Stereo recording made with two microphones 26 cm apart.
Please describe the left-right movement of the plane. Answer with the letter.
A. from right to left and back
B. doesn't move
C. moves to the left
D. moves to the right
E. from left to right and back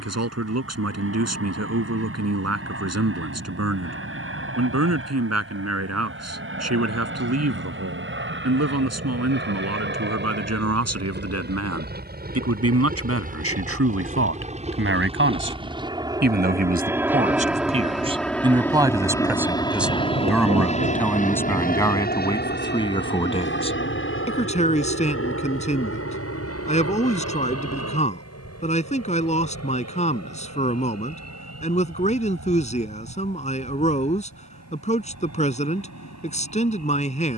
C.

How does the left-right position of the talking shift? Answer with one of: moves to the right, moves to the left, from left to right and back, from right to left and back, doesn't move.
moves to the left.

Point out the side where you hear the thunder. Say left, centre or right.
right.